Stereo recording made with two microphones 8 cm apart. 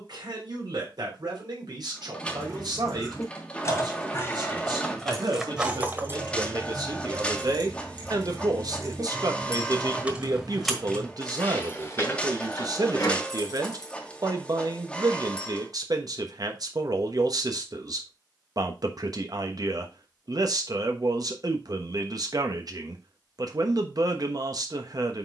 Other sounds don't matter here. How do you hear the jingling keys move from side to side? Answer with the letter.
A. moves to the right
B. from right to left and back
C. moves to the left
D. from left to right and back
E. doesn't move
D.